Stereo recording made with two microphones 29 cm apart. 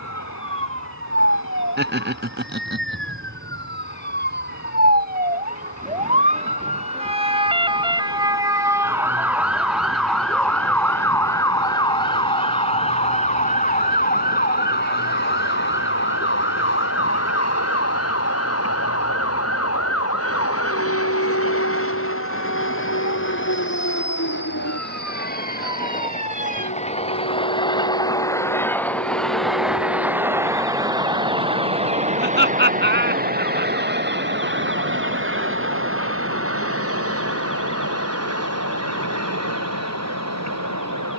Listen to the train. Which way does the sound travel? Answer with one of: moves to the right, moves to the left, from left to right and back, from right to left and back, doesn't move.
moves to the right.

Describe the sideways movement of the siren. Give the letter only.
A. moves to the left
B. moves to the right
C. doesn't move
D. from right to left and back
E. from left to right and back
A.